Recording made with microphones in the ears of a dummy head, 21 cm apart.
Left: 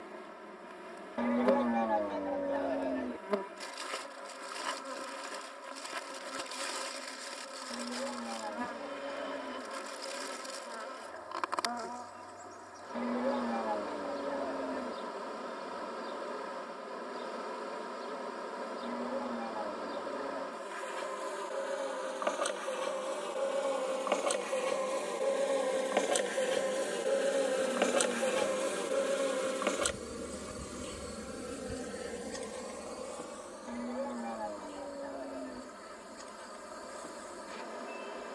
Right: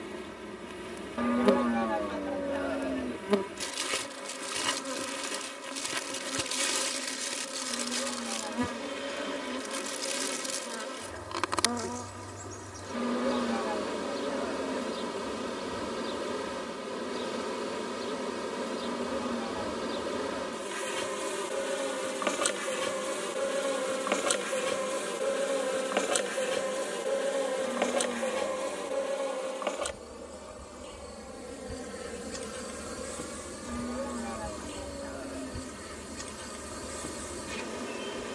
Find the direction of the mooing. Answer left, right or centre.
centre.